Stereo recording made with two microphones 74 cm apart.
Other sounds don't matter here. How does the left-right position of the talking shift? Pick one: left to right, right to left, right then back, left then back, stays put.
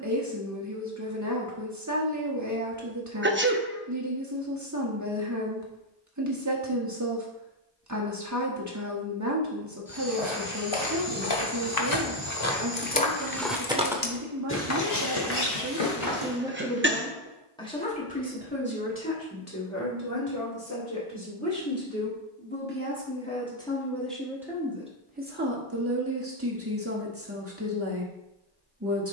left then back.